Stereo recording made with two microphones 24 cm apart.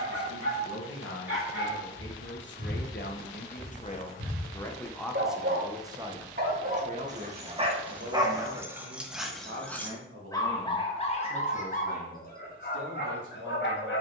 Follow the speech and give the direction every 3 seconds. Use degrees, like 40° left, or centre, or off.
60° left, 10° left, 40° right, 60° right, 70° right.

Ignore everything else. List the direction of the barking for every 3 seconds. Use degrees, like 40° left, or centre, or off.
60° right, 50° right, 20° right, 20° left, 40° left.